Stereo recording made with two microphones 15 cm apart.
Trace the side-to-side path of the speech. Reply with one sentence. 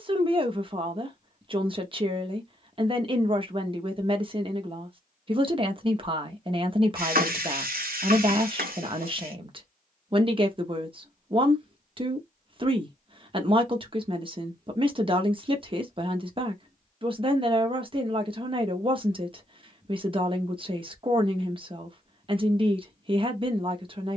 In this clip you hear the speech stay in one place.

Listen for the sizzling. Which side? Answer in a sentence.
You can hear the sizzling on the right.